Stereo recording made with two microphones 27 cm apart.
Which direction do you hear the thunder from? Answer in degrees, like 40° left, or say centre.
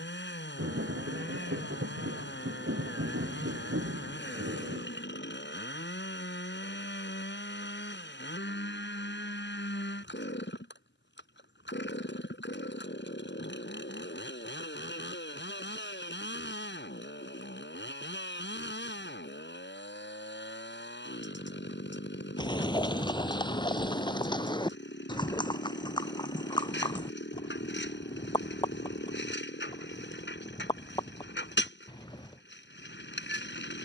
50° right.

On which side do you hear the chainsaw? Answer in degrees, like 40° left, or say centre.
40° left.